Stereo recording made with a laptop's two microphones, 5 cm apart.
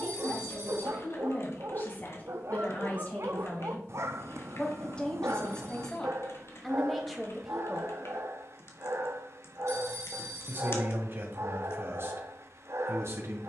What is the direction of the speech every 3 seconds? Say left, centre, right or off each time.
left, left, centre, right, right.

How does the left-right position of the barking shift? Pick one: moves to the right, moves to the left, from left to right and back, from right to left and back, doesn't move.
doesn't move.